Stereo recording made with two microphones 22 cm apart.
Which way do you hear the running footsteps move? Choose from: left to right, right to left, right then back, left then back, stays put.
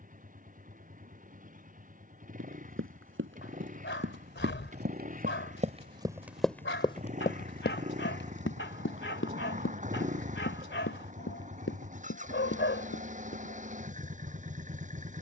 right to left.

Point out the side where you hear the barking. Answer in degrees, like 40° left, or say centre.
60° left.